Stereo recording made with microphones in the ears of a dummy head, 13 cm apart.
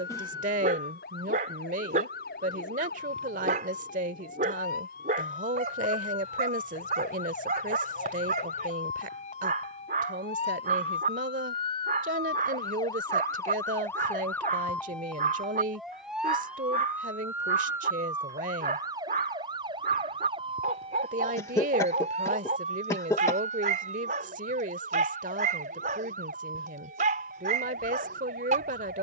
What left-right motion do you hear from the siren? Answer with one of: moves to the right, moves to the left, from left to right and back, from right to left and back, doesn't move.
moves to the right.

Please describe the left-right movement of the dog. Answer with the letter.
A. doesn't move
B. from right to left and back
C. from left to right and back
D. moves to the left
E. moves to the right
A.